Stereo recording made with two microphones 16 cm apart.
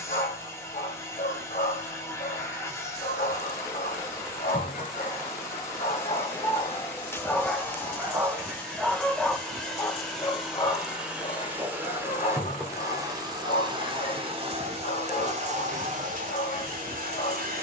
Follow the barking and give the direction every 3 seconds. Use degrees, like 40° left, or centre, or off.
50° left, 50° left, 10° left, 30° left, 50° left, 50° left.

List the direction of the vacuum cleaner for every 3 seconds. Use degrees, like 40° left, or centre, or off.
20° left, 20° left, 10° left, centre, 30° right, 50° right.